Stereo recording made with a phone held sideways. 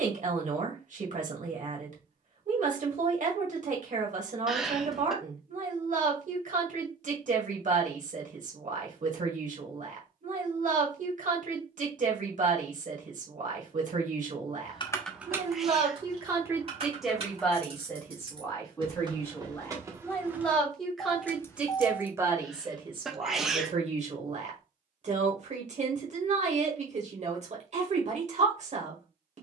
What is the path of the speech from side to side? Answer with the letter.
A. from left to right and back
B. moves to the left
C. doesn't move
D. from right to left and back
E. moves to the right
D.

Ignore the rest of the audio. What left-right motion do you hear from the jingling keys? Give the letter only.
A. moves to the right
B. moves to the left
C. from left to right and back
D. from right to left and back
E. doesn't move
C.